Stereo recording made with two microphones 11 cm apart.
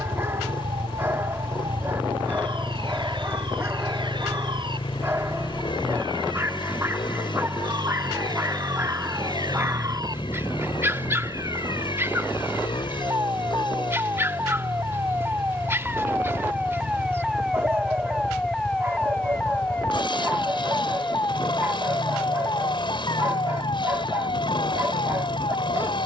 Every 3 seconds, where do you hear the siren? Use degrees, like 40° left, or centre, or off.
50° right, 50° right, 40° right, 30° right, 20° right, 10° right, 10° left, 40° left, 50° left.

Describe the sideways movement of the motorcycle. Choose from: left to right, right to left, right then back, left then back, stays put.
stays put.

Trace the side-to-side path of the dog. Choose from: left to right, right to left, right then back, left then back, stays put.
stays put.